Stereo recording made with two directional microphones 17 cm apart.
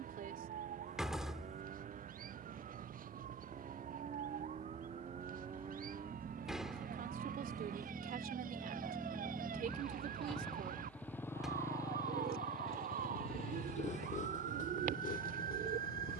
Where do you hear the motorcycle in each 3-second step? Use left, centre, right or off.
right, right, right, centre, left, left.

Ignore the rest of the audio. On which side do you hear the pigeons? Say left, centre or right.
right.